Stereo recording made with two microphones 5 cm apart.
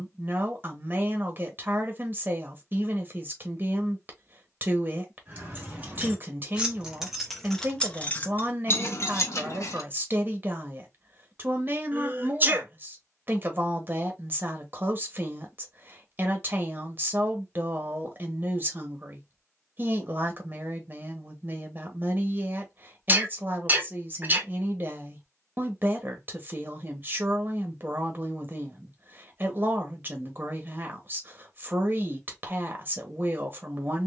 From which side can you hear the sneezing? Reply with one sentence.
You can hear the sneezing on the right.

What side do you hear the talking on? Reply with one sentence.
You can hear the talking on the right.